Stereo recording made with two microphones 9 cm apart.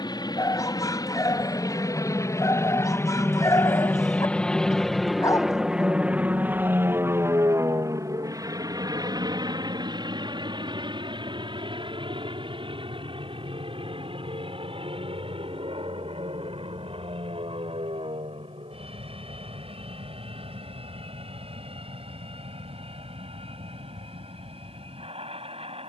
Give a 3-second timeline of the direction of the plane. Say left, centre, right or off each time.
left, centre, right, right, right, right, right, right, right.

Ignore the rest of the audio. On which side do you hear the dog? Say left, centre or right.
left.